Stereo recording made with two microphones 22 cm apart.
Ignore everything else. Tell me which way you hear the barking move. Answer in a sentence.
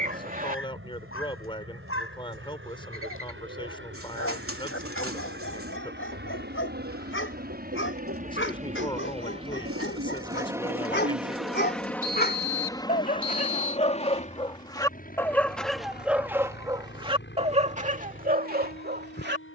You can hear the barking move from left to right.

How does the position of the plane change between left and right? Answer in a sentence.
You can hear the plane move to the left.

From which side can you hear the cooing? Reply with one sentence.
You can hear the cooing on the right.